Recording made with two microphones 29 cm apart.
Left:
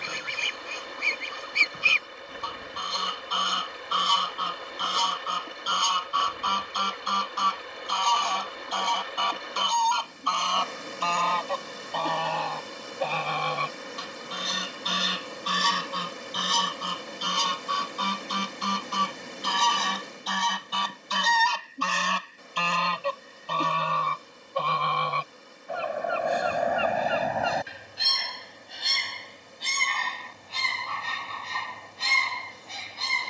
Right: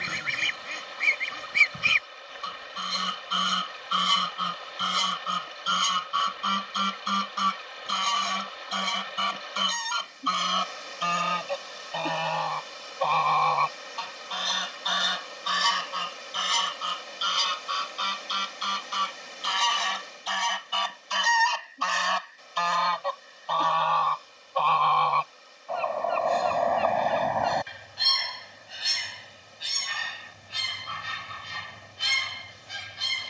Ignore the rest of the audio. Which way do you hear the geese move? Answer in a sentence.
You can hear the geese move from right to left and back again.